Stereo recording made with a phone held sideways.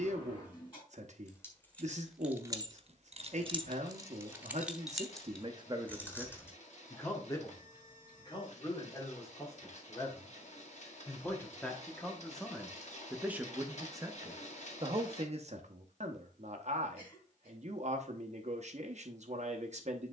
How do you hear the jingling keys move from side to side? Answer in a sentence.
You can hear the jingling keys go right and come back.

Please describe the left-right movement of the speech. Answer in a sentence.
You can hear the speech move from right to left and back again.